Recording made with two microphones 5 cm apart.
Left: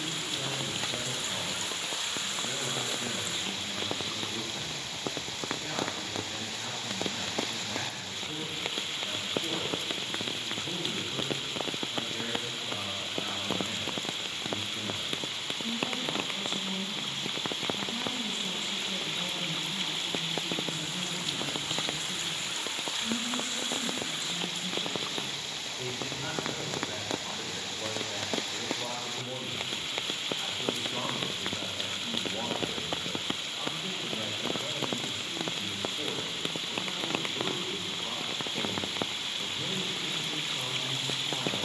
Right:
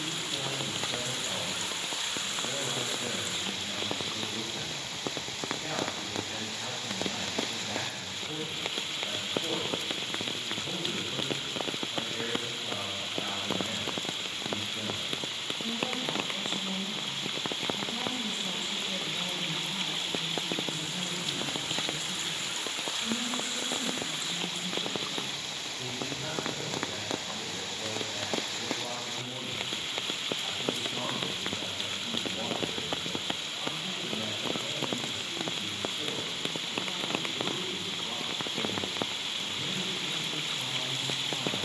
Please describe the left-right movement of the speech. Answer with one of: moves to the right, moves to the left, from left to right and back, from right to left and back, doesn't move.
moves to the left.